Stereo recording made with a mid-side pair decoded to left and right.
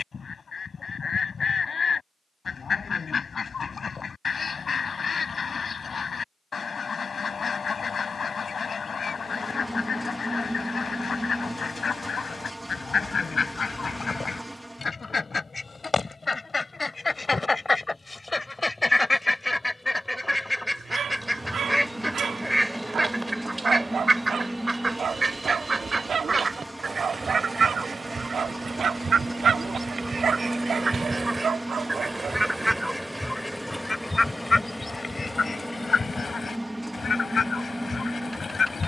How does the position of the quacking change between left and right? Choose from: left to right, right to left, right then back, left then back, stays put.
right then back.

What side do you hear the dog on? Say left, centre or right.
right.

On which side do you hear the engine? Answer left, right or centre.
centre.